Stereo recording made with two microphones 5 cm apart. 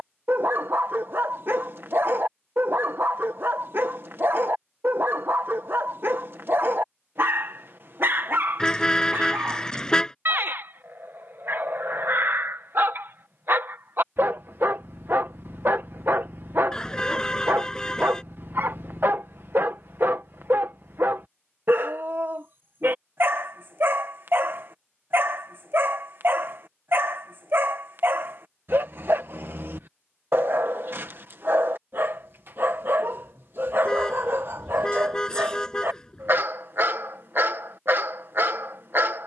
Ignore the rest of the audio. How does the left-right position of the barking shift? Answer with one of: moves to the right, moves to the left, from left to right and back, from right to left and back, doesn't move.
doesn't move.